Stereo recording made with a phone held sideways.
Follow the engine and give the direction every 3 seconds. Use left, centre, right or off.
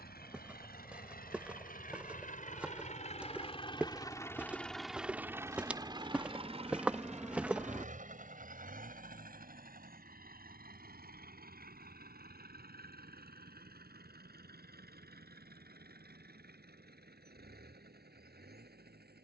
left, centre, right, right, right, right, right.